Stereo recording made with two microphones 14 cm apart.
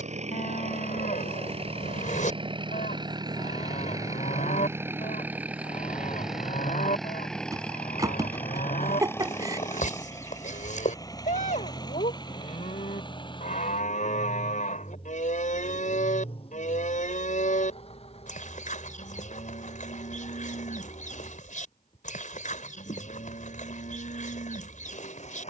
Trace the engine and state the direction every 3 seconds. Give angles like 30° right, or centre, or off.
40° right, 20° right, centre, 20° left, 30° left, 40° left, 50° left, 50° left, 50° left.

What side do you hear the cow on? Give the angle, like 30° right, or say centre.
60° left.